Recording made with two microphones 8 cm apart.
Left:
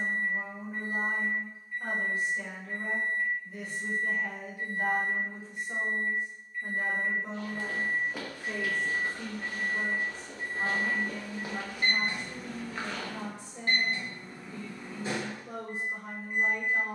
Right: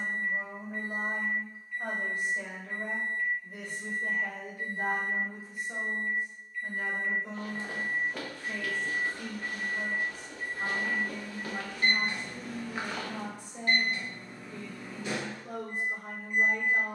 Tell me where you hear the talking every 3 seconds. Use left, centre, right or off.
right, right, left, left, right, right.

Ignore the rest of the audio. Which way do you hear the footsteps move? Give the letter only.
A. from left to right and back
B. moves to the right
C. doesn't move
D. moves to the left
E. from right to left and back
E.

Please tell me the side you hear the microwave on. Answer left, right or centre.
left.